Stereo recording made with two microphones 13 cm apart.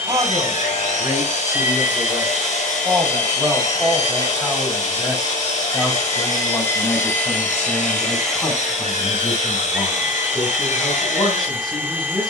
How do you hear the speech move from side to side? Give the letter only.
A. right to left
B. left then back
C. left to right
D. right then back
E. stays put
A.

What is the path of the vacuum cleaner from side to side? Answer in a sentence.
In this clip you hear the vacuum cleaner move from right to left and back again.